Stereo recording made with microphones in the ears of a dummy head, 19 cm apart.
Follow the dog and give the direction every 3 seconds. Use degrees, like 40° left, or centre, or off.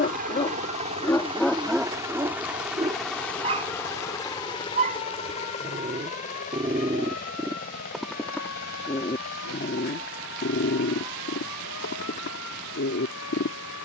10° left, 30° right, 10° right, 50° left, 60° left.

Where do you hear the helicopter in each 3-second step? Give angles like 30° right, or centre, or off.
20° right, 20° left, 40° left, 50° left, 60° left.